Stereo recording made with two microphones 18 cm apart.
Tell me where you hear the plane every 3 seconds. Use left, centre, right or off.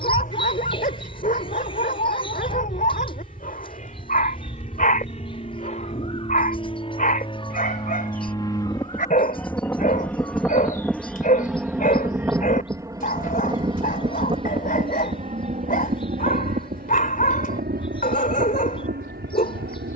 left, left, left, centre, right, right, right.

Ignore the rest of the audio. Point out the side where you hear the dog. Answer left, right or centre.
left.